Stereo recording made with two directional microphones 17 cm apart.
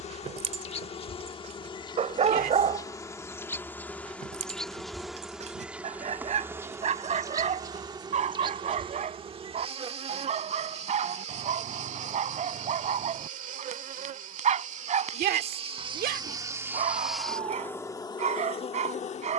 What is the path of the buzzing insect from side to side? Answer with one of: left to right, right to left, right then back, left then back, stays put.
right then back.